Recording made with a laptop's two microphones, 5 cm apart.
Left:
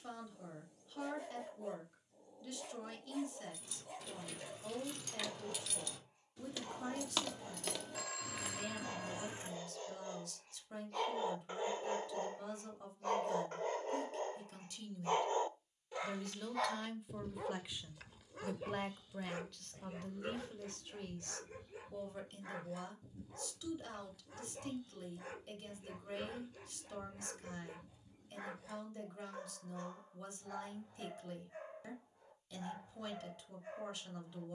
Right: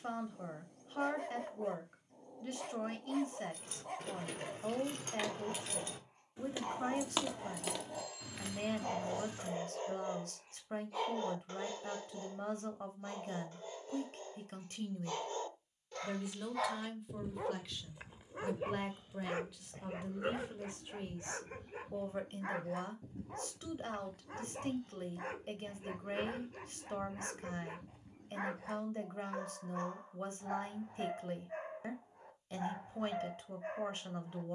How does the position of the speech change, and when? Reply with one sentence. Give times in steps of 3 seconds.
You can hear the speech on the right from 0 s, in the centre from 15 s and on the right from 21 s.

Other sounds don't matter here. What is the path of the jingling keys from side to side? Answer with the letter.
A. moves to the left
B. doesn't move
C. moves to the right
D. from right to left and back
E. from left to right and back
A.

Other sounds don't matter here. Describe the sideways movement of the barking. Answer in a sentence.
You can hear the barking move from right to left and back again.